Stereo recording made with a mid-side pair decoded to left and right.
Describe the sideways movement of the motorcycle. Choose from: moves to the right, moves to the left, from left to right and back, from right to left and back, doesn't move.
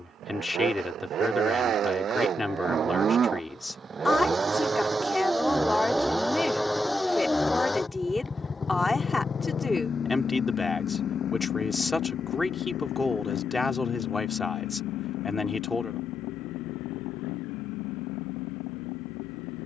moves to the left.